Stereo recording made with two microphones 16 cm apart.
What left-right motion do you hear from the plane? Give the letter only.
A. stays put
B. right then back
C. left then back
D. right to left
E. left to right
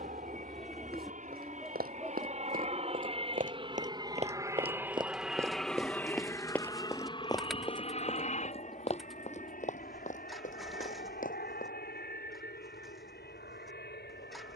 D.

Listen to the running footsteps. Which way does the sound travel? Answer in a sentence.
You can hear the running footsteps travel towards the left.